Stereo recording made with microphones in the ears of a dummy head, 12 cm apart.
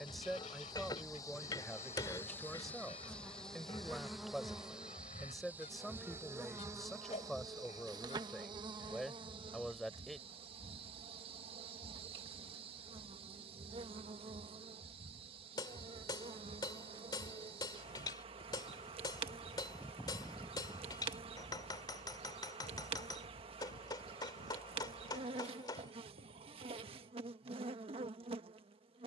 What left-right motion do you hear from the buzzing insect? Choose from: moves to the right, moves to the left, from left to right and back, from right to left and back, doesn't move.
moves to the right.